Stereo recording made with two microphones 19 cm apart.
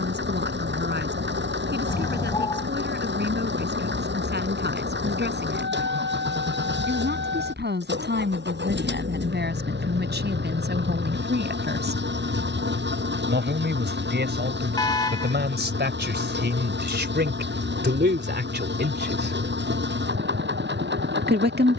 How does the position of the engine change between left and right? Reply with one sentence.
In this clip you hear the engine stay put.